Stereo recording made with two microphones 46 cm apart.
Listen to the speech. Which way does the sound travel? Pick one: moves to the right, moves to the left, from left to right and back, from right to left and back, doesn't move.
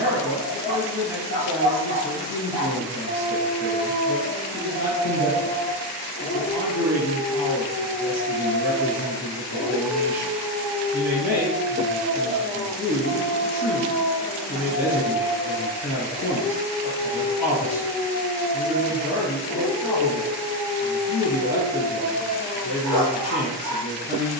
doesn't move.